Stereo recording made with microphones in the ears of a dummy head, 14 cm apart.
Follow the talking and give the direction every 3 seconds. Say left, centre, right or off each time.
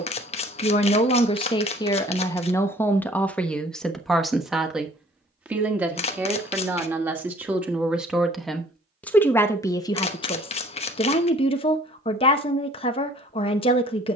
left, centre, centre, left, left.